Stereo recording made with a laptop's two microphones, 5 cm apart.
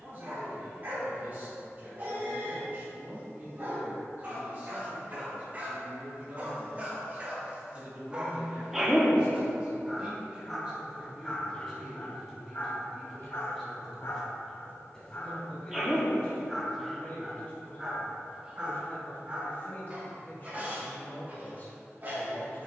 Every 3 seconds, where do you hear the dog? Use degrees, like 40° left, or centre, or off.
40° right, 30° right, 20° right, 10° left, 40° left, 10° left, 20° right, 40° right.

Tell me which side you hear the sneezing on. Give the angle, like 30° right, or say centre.
10° right.